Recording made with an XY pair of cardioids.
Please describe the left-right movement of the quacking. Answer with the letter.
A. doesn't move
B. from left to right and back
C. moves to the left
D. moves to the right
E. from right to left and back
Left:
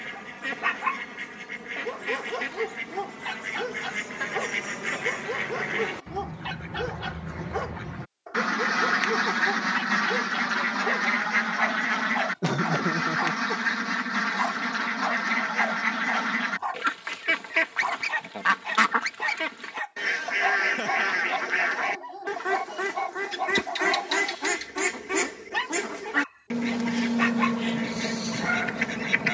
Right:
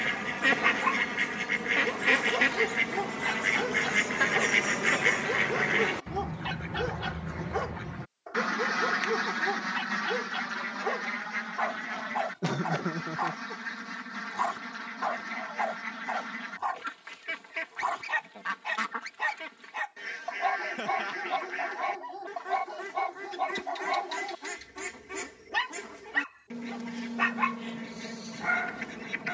C.